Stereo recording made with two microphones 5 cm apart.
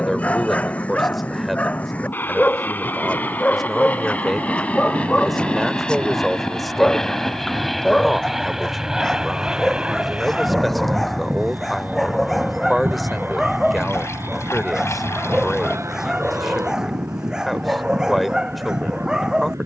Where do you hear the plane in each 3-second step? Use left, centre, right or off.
left, left, centre, right, right, right, right.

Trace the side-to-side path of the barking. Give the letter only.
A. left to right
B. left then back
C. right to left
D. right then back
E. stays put
A.